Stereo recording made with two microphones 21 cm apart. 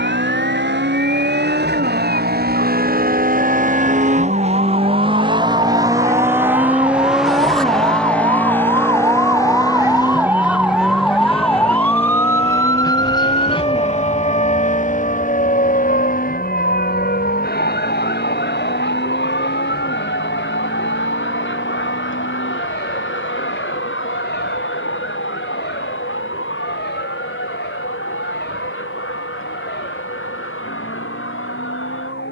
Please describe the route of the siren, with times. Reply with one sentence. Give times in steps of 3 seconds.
In this clip you hear the siren on the right from 0 s, in the centre from 9 s and on the left from 12 s.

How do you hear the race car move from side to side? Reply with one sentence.
In this clip you hear the race car travel towards the left.